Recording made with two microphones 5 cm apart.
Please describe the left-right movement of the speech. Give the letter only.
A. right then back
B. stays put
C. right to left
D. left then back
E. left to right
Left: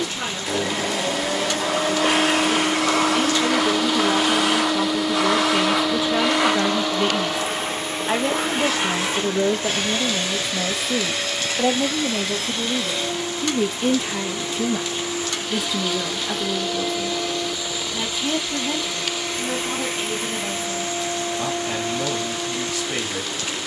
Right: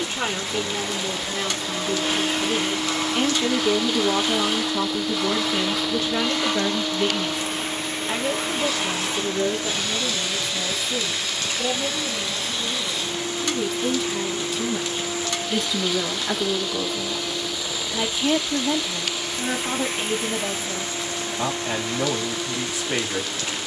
D.